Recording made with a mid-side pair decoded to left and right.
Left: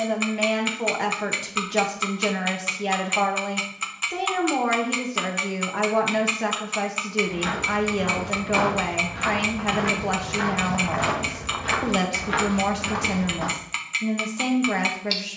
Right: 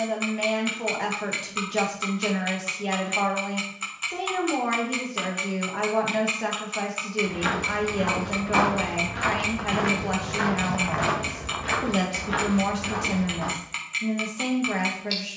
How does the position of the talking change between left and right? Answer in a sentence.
You can hear the talking stay in one place.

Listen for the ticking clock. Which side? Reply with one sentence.
You can hear the ticking clock on the left.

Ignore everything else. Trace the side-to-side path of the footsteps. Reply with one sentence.
You can hear the footsteps go from the right side to the left.